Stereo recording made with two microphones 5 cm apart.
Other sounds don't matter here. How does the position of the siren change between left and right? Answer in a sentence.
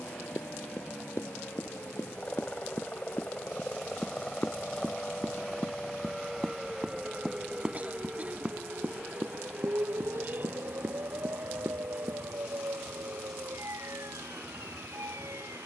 In this clip you hear the siren travel towards the right.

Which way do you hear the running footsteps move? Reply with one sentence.
In this clip you hear the running footsteps move to the right.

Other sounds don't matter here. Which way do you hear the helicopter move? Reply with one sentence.
In this clip you hear the helicopter go from the left side to the right.